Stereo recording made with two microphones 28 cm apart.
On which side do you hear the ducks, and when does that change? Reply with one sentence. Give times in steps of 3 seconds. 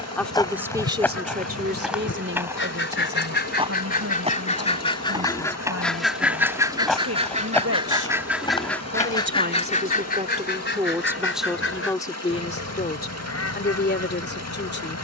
In this clip you hear the ducks on the left from 0 s, in the centre from 6 s and on the left from 9 s.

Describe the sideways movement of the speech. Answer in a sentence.
You can hear the speech go right and come back.